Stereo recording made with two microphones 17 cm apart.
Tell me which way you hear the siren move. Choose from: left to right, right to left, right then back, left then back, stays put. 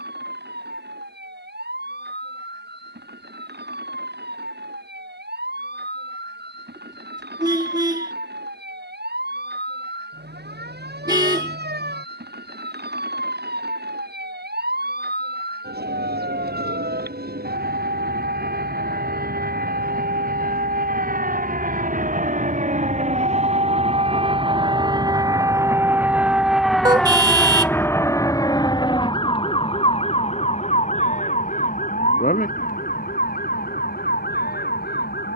right to left.